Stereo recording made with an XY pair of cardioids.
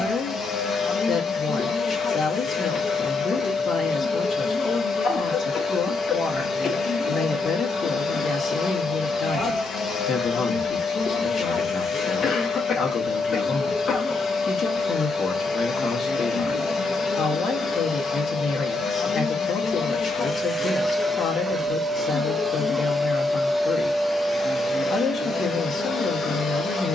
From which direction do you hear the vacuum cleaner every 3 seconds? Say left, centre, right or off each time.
left, left, left, left, left, left, left, centre, left.